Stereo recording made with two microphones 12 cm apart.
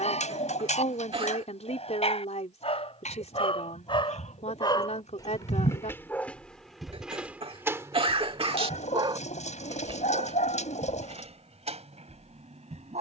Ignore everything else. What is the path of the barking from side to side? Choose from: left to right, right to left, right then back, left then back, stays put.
left to right.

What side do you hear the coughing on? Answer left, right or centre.
right.